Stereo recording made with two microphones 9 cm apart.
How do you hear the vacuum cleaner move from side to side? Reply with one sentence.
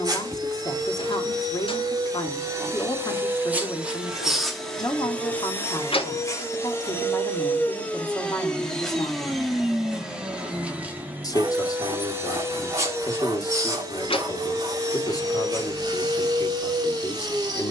You can hear the vacuum cleaner go left and come back.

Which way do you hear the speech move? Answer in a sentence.
You can hear the speech stay put.